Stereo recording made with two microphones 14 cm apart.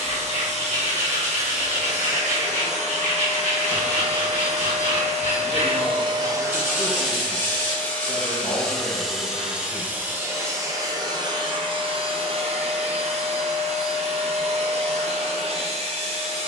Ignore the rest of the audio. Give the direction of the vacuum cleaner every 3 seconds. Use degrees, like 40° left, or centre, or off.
50° right, 50° right, centre, 20° right, 50° right, 50° right.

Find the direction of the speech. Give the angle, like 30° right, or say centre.
30° left.